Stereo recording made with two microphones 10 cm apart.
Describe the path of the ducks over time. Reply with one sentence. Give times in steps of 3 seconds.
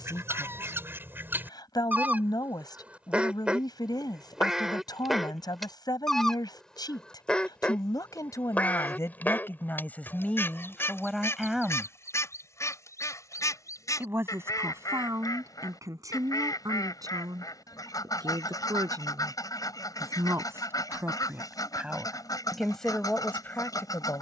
You can hear the ducks on the right from 0 s, in the centre from 3 s and on the left from 9 s.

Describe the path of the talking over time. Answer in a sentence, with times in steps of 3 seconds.
You can hear the talking on the left from 0 s, in the centre from 9 s, on the right from 12 s and in the centre from 21 s.